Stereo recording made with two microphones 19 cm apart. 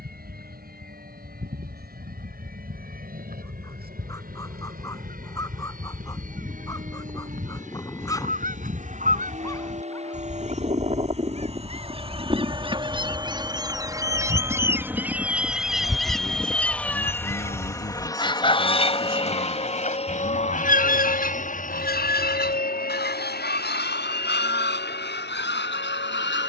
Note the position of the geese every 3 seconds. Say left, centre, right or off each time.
right, right, right, right, right, centre, left, left, left.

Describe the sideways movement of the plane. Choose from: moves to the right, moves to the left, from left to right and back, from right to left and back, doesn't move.
moves to the left.